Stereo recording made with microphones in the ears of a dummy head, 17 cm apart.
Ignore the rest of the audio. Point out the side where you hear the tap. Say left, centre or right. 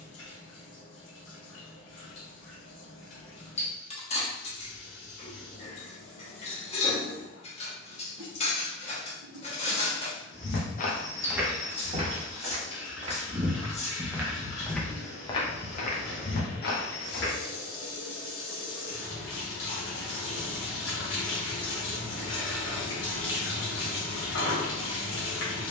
left.